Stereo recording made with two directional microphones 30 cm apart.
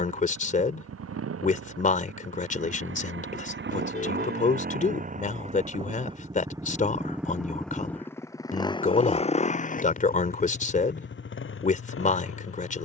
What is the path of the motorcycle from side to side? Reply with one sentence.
In this clip you hear the motorcycle move to the left.